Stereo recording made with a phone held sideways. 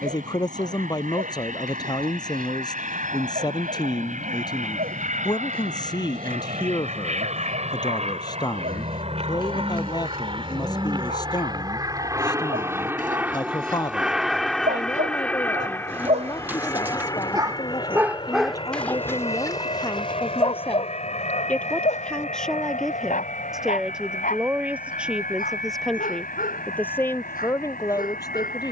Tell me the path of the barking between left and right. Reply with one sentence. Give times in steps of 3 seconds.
You can hear the barking on the right from 0 s and on the left from 18 s.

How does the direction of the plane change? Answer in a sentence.
In this clip you hear the plane travel towards the left.